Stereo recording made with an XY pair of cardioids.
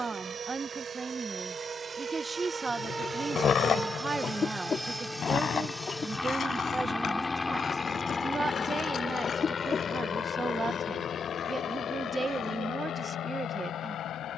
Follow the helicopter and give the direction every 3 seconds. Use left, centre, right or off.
right, centre, left, left, left.